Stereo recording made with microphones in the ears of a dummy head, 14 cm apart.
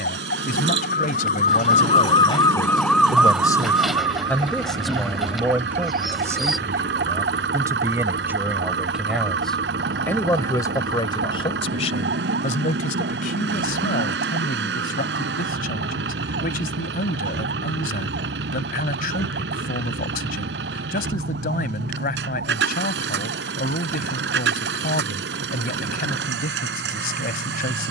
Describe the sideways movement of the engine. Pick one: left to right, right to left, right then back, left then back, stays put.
stays put.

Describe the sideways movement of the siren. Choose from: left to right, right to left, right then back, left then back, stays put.
left to right.